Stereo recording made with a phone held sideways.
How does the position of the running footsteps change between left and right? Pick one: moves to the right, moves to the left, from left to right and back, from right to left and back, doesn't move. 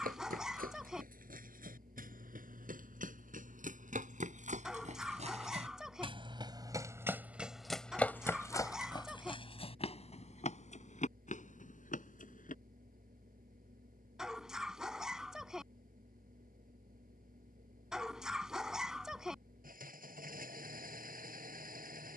moves to the left.